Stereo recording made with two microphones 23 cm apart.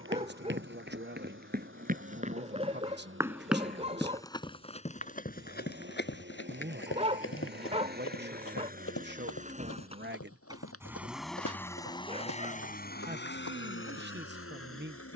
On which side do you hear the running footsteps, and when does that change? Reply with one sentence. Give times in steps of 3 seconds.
You can hear the running footsteps on the right from 0 s and on the left from 3 s.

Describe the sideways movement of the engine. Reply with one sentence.
You can hear the engine move from right to left.